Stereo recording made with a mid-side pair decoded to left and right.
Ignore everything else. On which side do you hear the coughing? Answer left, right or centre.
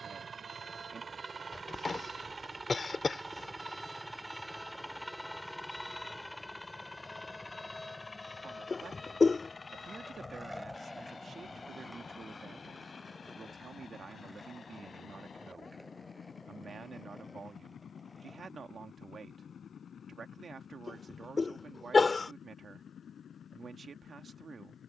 left.